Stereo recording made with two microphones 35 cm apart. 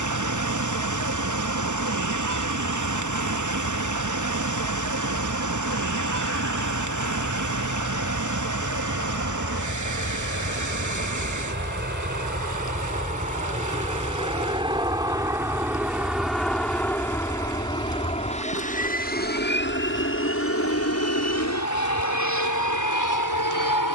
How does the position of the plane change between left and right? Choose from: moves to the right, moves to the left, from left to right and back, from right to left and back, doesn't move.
moves to the left.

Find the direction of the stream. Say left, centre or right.
right.